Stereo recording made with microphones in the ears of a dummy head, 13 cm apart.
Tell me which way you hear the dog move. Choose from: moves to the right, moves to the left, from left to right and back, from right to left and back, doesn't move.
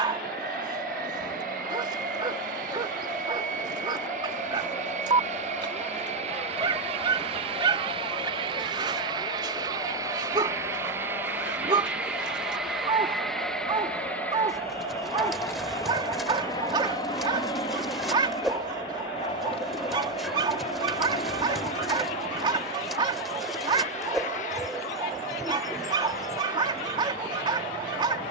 doesn't move.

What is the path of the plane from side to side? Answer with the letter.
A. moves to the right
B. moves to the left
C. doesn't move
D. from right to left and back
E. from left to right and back
B.